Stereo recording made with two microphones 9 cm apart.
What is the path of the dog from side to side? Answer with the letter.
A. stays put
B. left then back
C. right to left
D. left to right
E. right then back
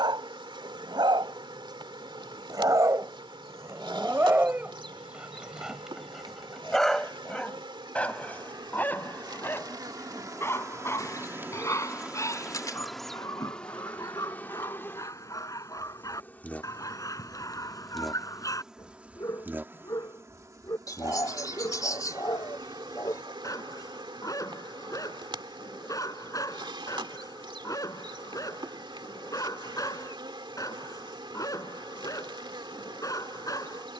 C.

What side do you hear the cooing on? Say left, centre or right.
left.